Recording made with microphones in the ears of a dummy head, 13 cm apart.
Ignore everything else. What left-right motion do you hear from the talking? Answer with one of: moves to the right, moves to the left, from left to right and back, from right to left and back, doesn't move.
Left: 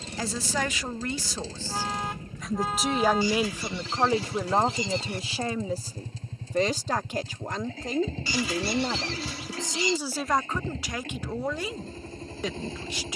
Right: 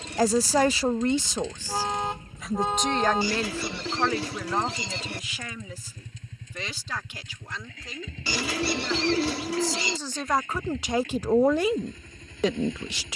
from right to left and back.